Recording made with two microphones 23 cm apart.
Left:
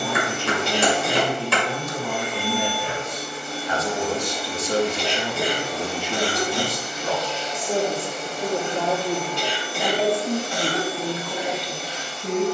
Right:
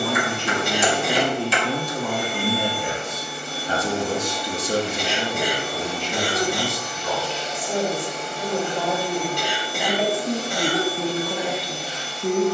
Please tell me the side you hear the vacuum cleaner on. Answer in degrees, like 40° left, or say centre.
40° right.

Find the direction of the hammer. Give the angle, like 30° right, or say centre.
60° left.